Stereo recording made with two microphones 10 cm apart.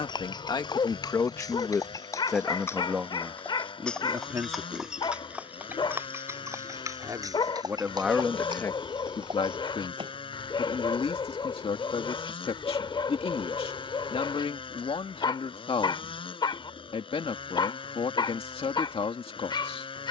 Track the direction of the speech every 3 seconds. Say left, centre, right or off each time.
left, right, centre, left, left, left, left.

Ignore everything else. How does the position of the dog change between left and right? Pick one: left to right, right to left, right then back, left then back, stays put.
stays put.